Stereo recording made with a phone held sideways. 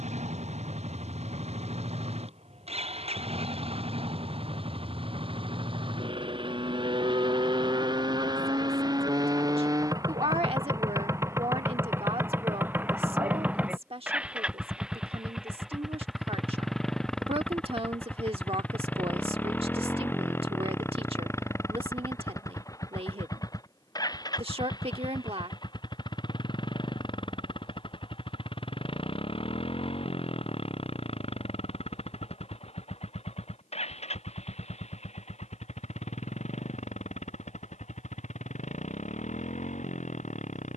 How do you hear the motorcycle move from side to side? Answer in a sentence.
In this clip you hear the motorcycle go from the right side to the left.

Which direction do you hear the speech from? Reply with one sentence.
In this clip you hear the speech on the right.